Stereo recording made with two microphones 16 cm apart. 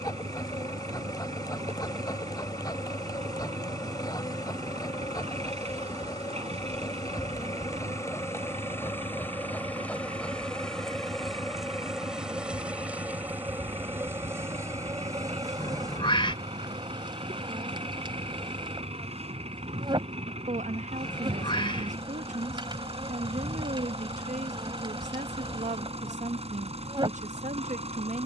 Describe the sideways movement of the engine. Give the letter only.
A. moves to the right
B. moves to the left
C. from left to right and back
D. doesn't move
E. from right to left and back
D.